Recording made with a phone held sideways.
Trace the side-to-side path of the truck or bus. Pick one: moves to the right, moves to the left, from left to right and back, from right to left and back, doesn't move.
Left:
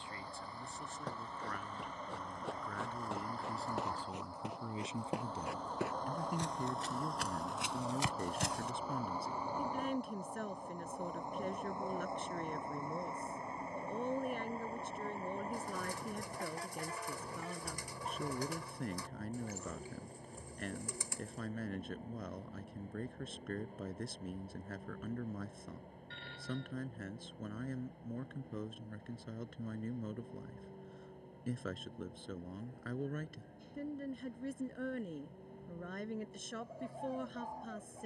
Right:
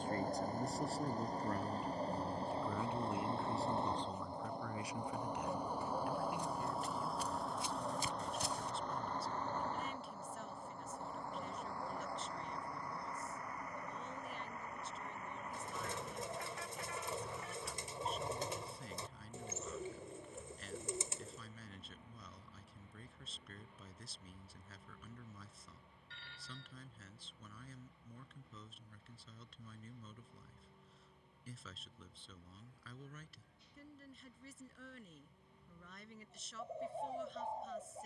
moves to the left.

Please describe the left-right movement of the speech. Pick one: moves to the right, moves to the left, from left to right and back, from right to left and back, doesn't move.
moves to the left.